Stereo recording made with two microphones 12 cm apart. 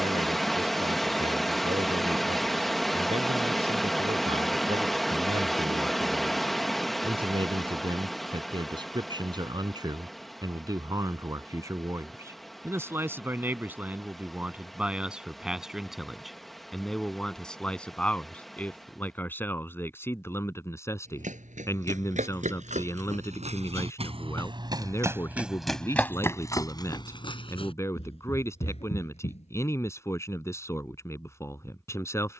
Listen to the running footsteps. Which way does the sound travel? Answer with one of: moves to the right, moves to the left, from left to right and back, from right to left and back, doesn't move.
moves to the left.